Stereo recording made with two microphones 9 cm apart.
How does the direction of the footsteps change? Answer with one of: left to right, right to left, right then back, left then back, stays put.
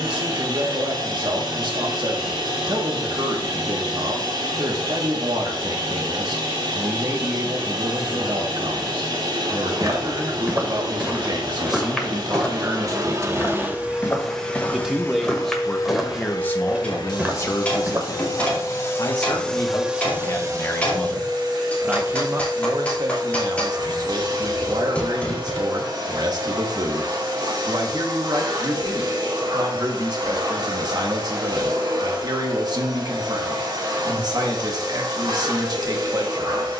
left then back.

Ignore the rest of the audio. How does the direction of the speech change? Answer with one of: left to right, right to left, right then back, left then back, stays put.
left then back.